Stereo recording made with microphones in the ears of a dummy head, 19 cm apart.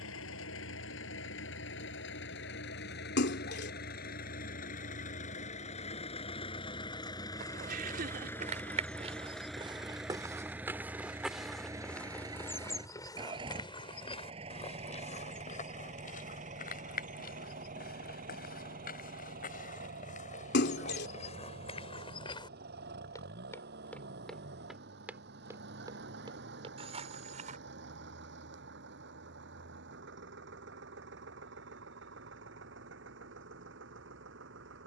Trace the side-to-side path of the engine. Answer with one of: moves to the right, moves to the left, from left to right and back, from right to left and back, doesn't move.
moves to the right.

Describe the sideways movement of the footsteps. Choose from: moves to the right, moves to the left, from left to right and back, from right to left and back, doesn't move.
from right to left and back.